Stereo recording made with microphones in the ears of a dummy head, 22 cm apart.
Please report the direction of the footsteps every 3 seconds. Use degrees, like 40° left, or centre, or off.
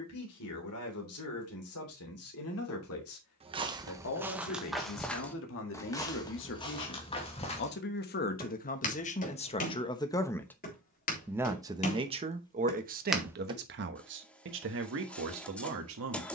off, centre, 20° left, 40° left, 10° left, off.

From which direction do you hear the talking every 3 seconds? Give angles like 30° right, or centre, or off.
70° left, 60° left, 50° left, 10° left, 40° right, 60° right.